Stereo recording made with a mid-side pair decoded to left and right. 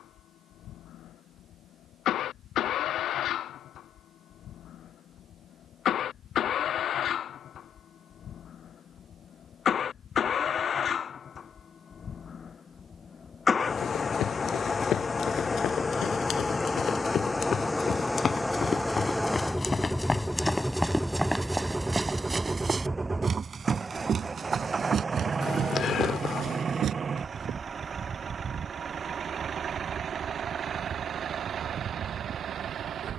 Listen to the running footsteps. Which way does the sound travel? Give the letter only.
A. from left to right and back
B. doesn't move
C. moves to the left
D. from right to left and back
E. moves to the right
E.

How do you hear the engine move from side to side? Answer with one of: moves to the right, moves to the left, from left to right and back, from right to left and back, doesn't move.
moves to the right.